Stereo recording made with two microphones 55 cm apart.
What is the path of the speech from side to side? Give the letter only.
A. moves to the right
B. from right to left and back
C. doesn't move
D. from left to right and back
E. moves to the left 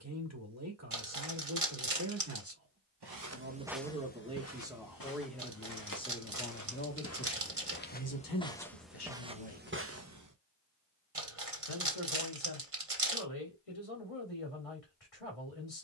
E.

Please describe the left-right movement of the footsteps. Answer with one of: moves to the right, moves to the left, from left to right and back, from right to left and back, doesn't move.
from right to left and back.